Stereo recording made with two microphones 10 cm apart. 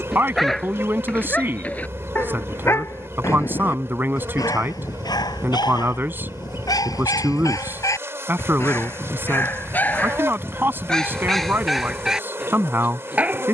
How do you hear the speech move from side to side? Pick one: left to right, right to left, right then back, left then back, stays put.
stays put.